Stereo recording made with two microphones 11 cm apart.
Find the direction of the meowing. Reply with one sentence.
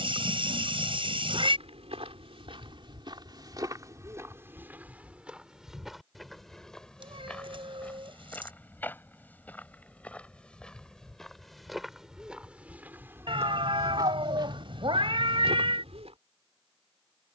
You can hear the meowing on the right.